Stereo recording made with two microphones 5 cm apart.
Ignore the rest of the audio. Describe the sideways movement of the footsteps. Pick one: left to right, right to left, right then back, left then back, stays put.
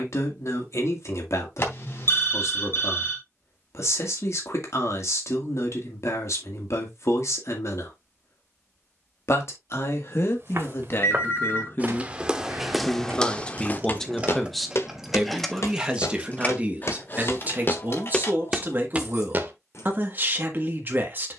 left then back.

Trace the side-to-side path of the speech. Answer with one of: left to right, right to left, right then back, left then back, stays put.
left to right.